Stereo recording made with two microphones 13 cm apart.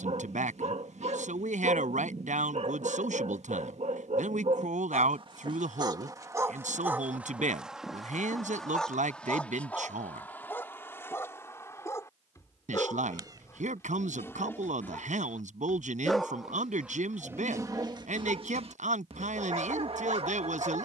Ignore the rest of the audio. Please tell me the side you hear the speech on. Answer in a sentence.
You can hear the speech on the right.